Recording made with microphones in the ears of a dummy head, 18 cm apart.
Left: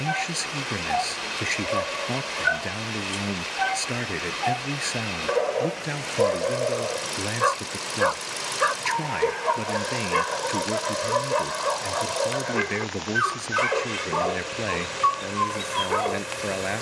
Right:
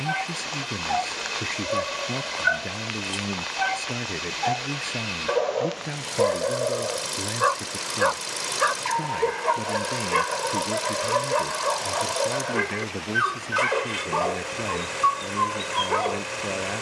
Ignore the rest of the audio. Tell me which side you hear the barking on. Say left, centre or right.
centre.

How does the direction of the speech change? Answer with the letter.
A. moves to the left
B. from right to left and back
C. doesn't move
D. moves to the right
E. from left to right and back
C.